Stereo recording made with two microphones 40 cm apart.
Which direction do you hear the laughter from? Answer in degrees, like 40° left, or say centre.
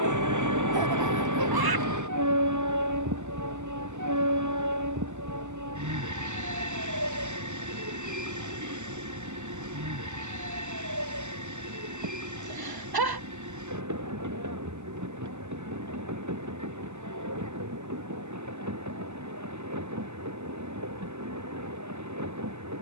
60° right.